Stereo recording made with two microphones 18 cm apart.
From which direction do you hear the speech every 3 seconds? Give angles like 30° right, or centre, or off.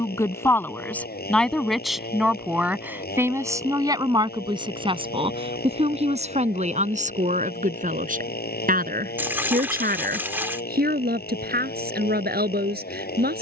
centre, 20° right, 40° right, 60° right, 60° right.